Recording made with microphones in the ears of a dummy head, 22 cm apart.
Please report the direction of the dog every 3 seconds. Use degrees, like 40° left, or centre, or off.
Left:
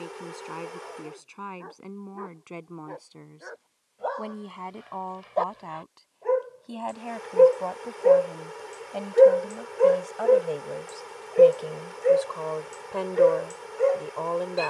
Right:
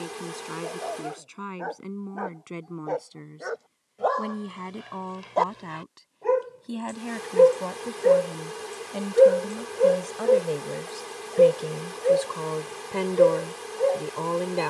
80° right, 70° right, 30° right, centre, 20° left.